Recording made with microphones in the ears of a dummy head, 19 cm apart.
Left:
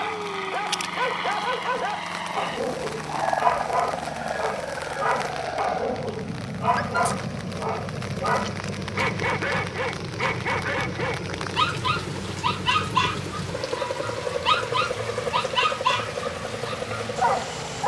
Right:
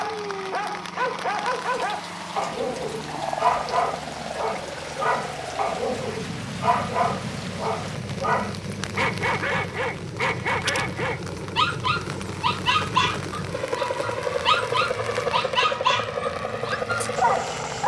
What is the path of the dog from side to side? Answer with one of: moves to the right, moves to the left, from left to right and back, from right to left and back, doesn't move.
doesn't move.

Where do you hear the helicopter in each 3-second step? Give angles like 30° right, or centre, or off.
70° left, 60° left, 40° left, 10° left, 20° right, 40° right.